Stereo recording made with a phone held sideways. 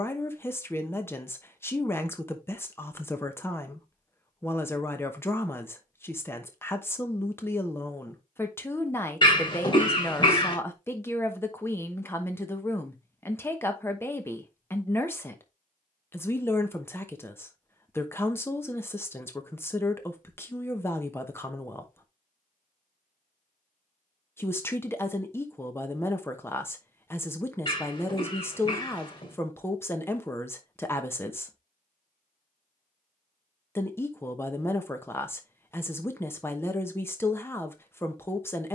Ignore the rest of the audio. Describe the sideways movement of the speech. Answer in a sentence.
In this clip you hear the speech stay put.